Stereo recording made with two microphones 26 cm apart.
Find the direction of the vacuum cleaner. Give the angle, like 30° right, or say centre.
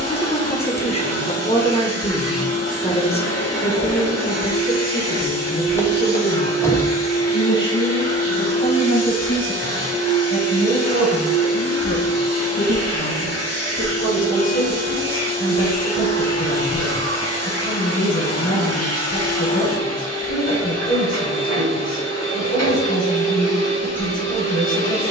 70° left.